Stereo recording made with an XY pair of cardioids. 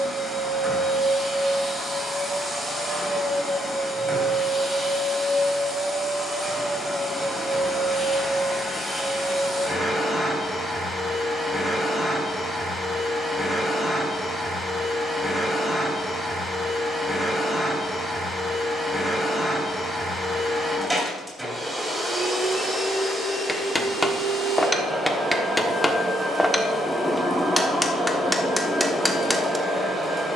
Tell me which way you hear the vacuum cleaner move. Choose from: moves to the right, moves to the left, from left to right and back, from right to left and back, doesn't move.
doesn't move.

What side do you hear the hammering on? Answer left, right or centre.
centre.